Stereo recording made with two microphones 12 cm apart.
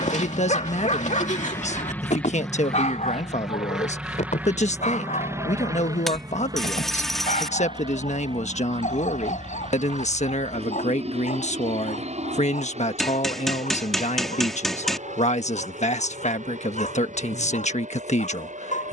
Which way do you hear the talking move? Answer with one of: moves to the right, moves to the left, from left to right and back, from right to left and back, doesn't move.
doesn't move.